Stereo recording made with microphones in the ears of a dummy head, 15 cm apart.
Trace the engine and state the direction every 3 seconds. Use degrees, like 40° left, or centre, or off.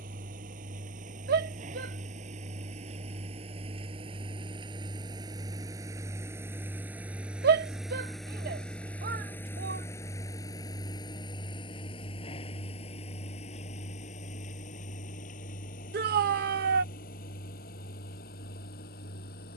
50° right, 30° right, 10° right, 20° left, 40° left, 50° left, 60° left.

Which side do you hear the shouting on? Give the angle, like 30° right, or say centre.
60° right.